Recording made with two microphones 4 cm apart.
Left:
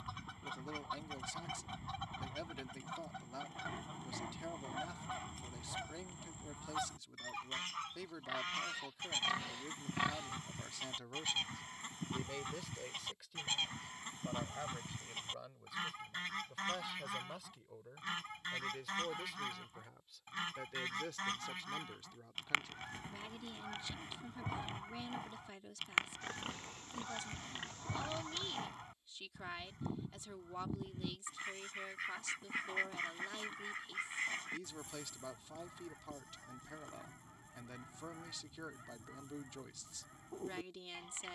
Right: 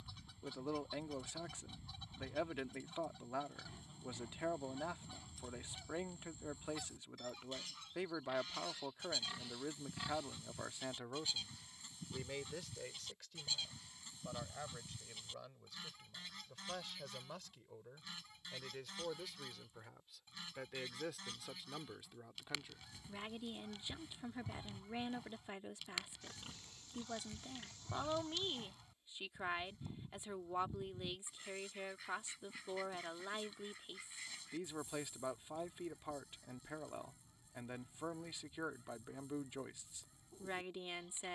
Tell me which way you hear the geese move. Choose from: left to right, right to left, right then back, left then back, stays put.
stays put.